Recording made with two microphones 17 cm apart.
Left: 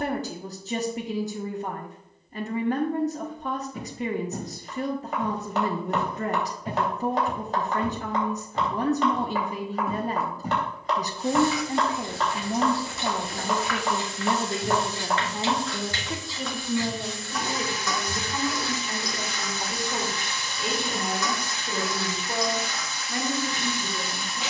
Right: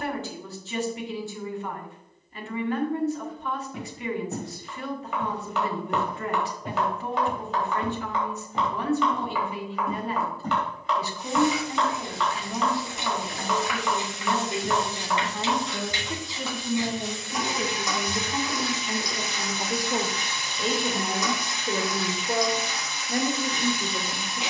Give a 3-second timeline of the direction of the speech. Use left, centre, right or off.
left, left, left, left, left, centre, right, right.